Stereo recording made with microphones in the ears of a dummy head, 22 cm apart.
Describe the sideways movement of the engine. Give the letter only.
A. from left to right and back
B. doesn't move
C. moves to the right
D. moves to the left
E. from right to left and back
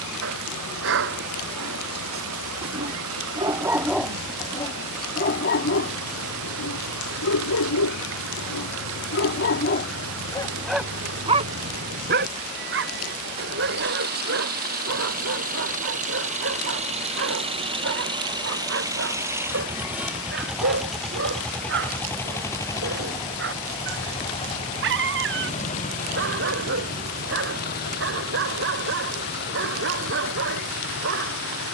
D.